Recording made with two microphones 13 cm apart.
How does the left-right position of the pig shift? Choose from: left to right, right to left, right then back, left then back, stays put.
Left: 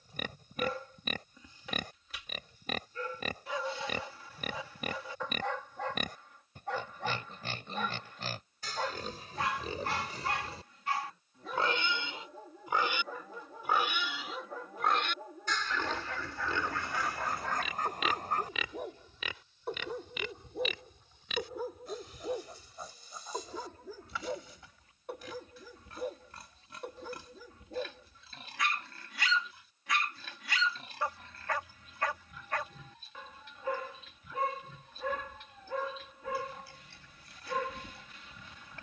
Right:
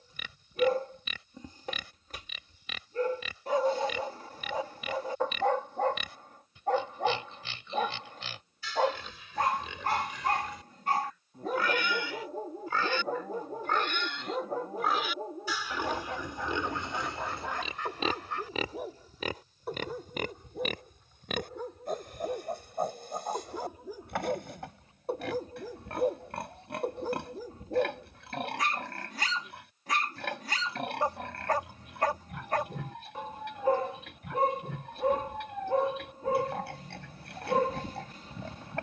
left to right.